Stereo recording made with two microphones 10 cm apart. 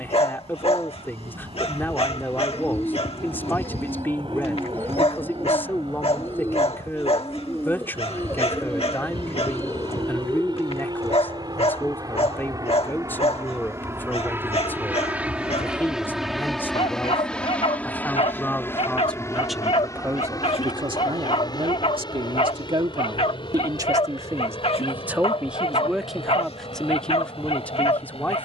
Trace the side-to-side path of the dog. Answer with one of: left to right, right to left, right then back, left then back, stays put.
stays put.